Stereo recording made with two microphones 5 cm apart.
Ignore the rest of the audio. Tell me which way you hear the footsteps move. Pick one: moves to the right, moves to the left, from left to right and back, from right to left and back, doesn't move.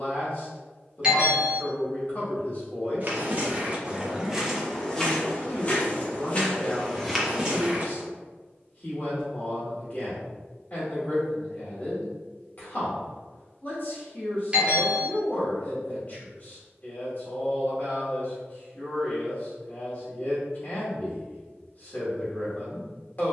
from right to left and back.